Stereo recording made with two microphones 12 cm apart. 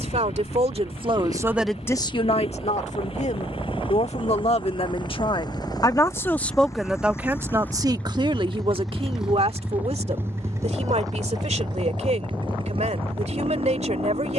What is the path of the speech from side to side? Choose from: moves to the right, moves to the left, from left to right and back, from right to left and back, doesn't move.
from right to left and back.